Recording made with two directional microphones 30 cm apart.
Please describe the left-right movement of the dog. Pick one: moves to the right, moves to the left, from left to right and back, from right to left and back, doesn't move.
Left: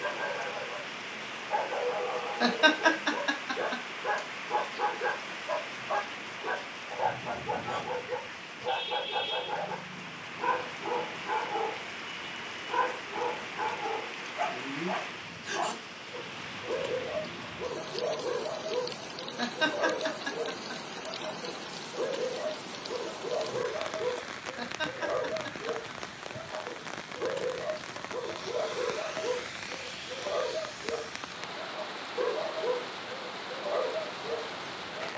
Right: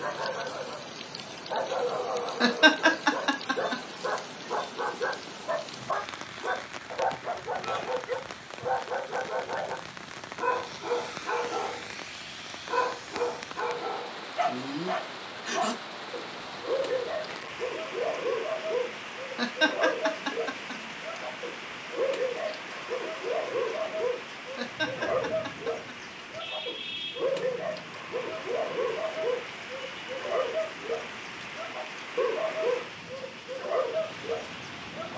doesn't move.